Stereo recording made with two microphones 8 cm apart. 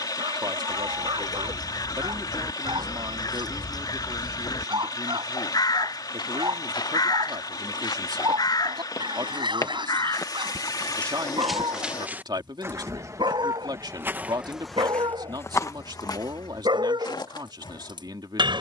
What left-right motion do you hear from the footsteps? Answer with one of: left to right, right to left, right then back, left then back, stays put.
right then back.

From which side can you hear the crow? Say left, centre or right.
left.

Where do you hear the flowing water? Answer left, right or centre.
left.